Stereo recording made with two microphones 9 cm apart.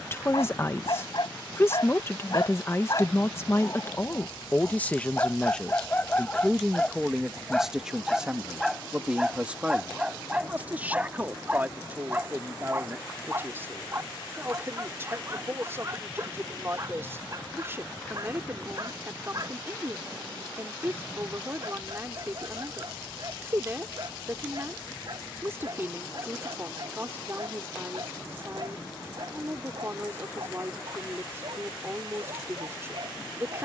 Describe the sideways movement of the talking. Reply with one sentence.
You can hear the talking move from left to right.